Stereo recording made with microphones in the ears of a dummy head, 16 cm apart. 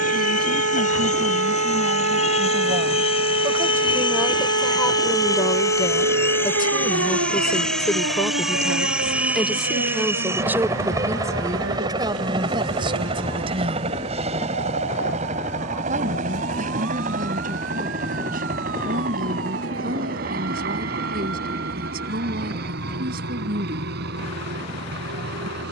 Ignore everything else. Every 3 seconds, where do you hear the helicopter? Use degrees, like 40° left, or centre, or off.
40° left, 30° left, centre, 20° right, 30° right, 40° right, 50° right, 60° right, 60° right.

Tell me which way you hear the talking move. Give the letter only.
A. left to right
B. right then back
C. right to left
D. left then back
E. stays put
D.